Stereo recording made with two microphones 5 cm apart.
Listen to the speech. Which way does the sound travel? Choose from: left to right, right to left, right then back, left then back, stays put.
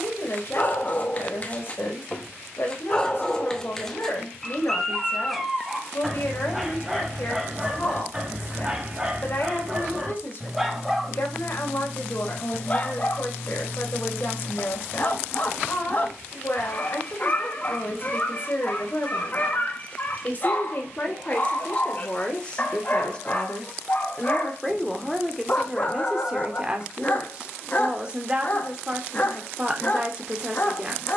left to right.